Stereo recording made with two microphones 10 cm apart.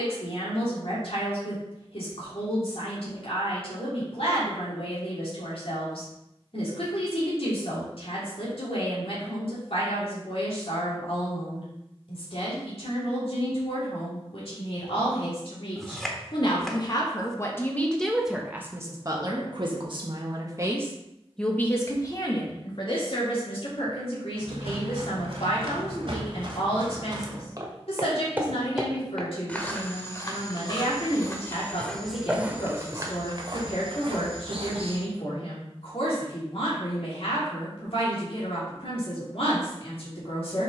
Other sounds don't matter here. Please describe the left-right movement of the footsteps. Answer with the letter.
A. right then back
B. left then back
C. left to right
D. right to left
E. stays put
B.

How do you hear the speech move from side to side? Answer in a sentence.
In this clip you hear the speech go right and come back.